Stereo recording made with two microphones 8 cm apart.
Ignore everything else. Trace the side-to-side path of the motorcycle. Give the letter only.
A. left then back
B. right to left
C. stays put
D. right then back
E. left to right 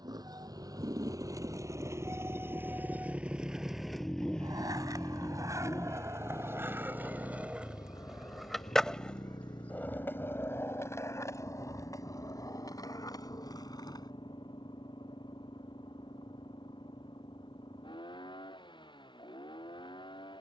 B.